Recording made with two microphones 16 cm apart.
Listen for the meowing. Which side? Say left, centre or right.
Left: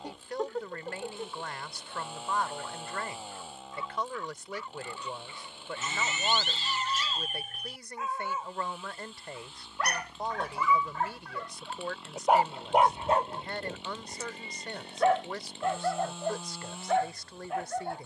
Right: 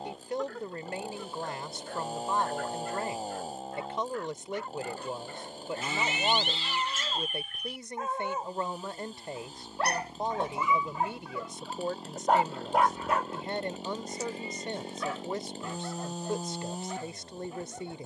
left.